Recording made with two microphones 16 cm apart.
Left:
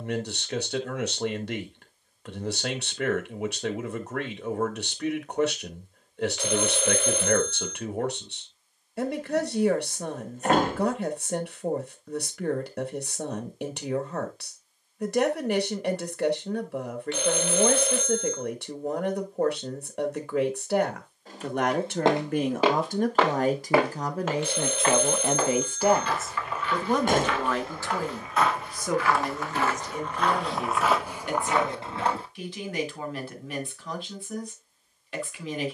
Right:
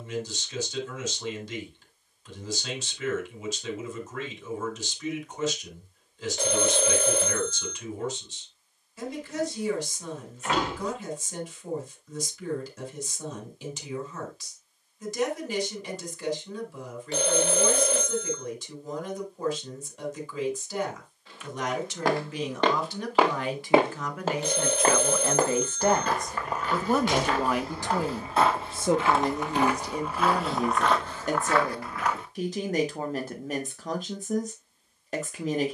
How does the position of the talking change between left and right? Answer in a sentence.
In this clip you hear the talking move from left to right.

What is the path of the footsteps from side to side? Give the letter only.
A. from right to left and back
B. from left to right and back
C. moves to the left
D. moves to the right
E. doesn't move
B.